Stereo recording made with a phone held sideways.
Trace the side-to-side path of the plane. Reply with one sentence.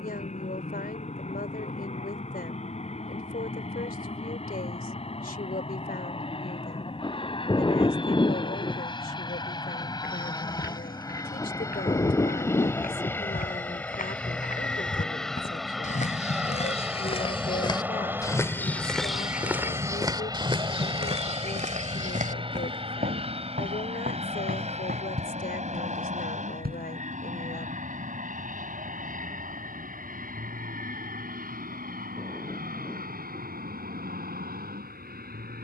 You can hear the plane travel towards the right.